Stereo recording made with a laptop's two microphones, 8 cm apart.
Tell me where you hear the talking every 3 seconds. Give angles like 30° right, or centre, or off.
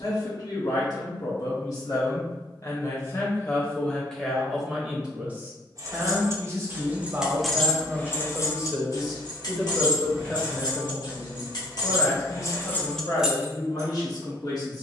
50° left, centre, 30° right, 10° left, 50° left.